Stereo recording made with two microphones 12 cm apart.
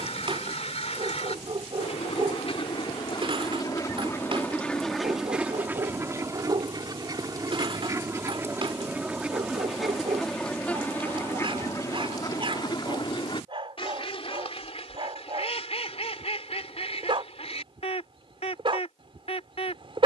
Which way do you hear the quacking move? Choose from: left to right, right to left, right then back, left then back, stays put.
right then back.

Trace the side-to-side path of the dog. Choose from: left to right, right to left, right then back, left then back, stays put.
stays put.